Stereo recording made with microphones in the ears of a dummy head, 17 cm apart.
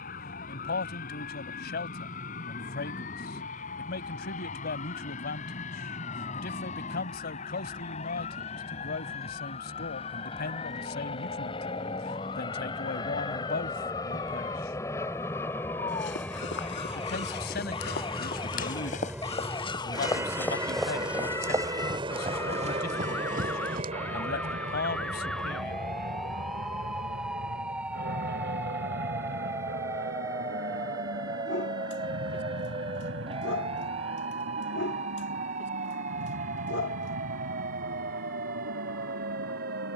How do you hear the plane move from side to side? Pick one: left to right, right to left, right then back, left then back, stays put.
left to right.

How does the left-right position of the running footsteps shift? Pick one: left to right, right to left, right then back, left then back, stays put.
left to right.